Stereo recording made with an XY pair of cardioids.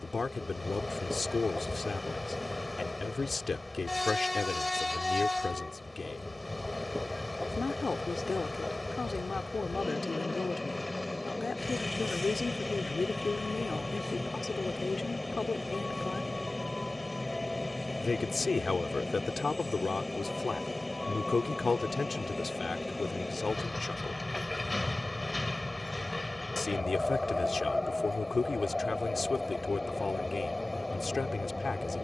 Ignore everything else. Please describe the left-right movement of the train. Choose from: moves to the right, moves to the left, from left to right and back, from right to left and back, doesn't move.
doesn't move.